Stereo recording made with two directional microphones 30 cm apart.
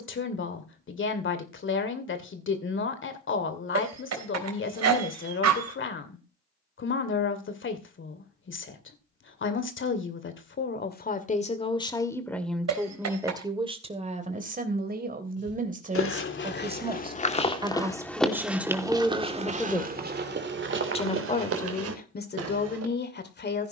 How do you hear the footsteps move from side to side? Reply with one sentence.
In this clip you hear the footsteps move to the right.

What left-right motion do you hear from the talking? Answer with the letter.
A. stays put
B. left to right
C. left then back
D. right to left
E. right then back
E.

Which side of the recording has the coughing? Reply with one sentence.
You can hear the coughing on the right.